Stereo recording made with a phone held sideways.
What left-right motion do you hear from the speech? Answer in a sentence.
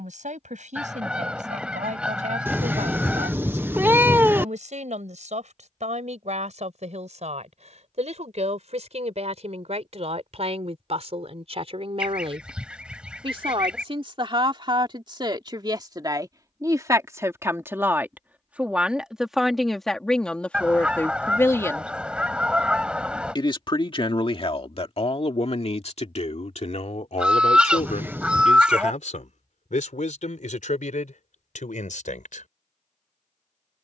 You can hear the speech move to the left.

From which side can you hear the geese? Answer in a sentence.
In this clip you hear the geese in the centre.